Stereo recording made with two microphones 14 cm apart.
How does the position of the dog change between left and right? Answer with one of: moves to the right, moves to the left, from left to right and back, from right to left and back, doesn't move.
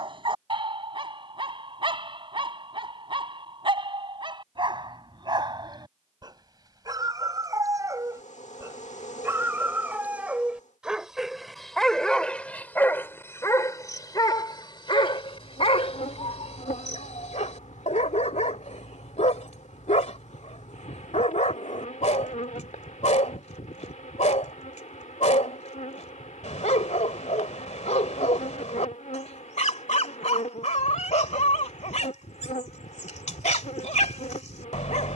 moves to the left.